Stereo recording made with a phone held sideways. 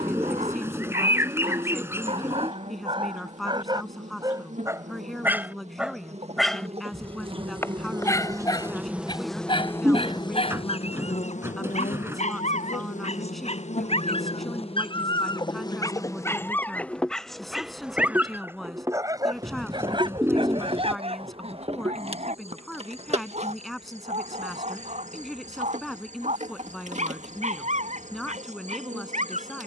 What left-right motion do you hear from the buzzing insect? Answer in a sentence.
In this clip you hear the buzzing insect go left and come back.